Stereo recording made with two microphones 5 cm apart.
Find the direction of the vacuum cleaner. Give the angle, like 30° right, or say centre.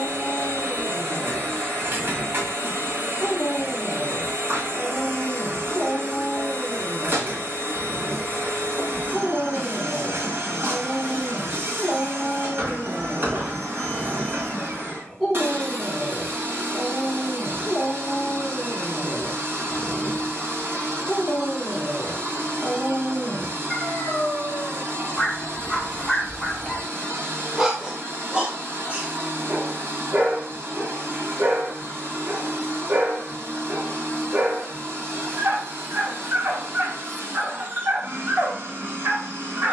50° right.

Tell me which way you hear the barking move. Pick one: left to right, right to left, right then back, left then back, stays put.
left to right.